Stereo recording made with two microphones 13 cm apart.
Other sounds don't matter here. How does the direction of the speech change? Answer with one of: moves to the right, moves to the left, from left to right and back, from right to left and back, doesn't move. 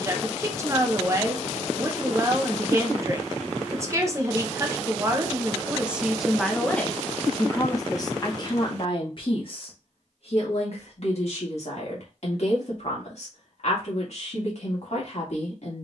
moves to the left.